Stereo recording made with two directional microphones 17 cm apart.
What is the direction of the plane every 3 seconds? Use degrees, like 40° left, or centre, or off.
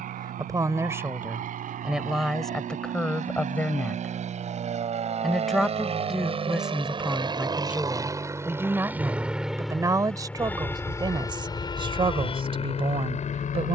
60° right, 50° right, 30° right, 10° left, 40° left.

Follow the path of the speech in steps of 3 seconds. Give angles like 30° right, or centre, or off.
10° right, centre, 10° right, 20° right, 30° right.